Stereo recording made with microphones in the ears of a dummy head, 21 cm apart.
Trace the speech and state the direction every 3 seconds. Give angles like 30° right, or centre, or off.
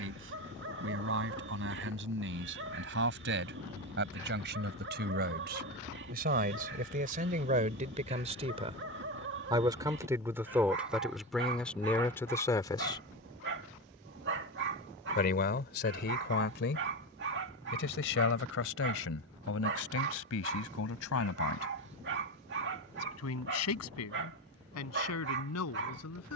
60° right, 50° right, 40° right, 10° right, 20° left, 50° left, 60° left, 70° left, 80° left.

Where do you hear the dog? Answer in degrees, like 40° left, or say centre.
50° right.